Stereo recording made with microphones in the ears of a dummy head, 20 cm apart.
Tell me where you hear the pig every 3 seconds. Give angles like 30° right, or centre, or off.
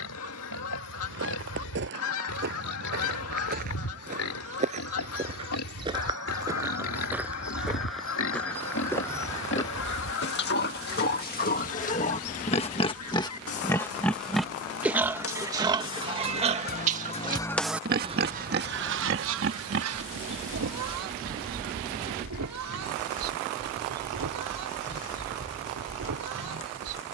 80° left, 70° left, 60° left, 50° left, 10° left, 30° right, 50° right, 60° right, 70° right.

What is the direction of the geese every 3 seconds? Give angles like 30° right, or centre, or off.
70° left, 70° left, 70° left, 70° left, 70° left, 40° left, 60° right, 80° right, 80° right.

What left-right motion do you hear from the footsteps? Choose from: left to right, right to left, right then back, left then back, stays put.
right to left.